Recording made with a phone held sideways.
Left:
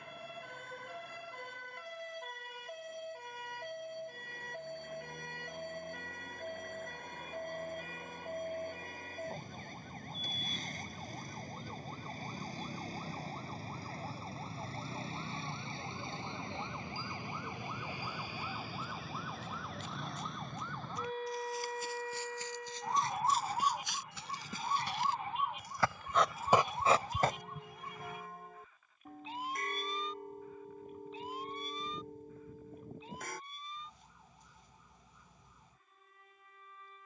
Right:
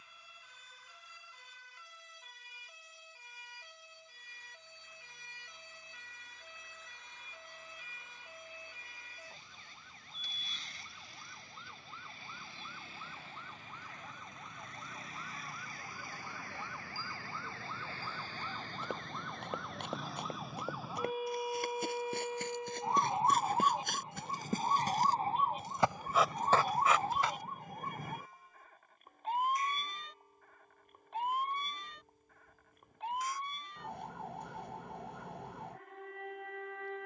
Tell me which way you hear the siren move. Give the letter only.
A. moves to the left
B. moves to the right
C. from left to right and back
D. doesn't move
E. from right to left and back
B.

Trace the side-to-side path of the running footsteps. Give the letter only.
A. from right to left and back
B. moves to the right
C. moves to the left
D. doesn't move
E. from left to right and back
C.